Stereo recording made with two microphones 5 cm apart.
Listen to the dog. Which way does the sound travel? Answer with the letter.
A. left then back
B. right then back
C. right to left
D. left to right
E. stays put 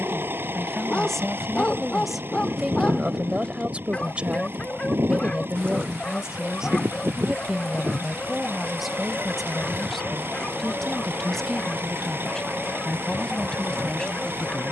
E.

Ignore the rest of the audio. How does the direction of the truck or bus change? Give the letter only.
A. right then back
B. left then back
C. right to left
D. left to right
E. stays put
E.